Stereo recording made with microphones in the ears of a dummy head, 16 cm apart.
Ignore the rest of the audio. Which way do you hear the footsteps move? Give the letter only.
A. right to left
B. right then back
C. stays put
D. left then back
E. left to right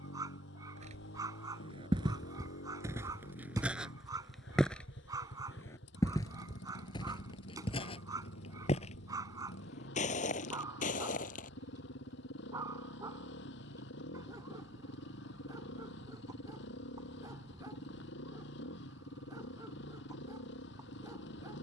A.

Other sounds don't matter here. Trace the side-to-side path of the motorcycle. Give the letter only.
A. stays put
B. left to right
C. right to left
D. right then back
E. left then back
A.